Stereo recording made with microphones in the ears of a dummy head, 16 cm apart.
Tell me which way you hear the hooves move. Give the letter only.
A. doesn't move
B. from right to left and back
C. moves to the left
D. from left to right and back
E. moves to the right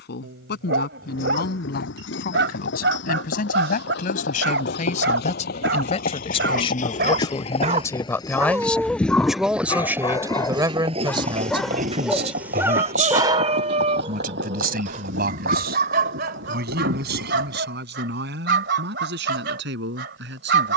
E.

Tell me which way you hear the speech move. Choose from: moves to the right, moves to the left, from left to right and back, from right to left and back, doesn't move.
moves to the right.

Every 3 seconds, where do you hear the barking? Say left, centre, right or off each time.
right, right, right, centre, right, right, right.